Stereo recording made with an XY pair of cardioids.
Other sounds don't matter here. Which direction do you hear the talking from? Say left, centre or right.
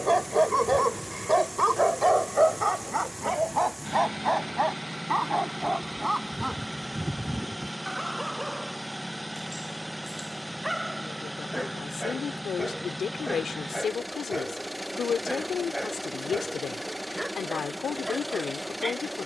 left.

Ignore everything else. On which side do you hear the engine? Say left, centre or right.
centre.